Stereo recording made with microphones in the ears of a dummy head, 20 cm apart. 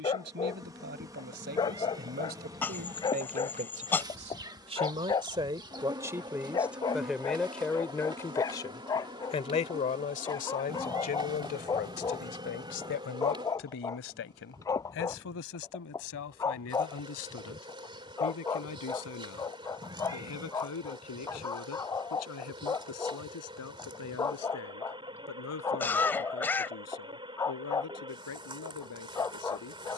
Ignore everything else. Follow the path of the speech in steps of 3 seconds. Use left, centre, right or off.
right, right, centre, left, left, left, left, left, left, left.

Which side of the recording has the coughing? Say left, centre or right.
centre.